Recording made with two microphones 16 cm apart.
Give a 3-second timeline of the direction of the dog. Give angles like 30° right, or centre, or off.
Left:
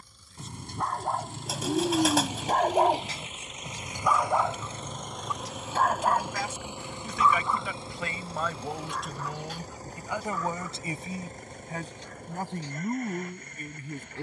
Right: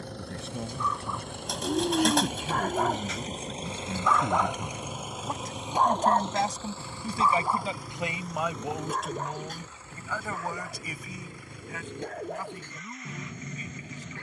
50° left, centre, 30° right, 50° right, 50° right.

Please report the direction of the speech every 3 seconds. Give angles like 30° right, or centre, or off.
70° right, 60° right, 30° right, 20° left, 50° left.